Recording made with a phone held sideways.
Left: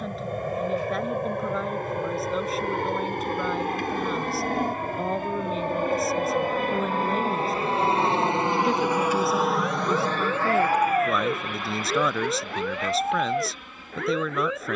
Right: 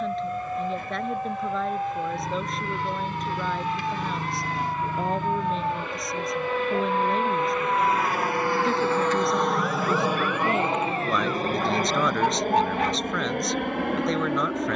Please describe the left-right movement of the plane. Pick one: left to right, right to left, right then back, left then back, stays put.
left to right.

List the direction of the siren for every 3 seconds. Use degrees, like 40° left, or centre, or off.
60° right, 50° right, 30° right, 20° left, 70° left.